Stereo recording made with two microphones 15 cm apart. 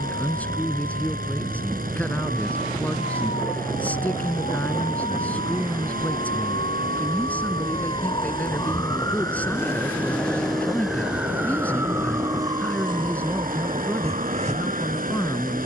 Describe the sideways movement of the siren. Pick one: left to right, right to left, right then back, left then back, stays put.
left to right.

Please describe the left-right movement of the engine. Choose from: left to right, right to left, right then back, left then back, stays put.
stays put.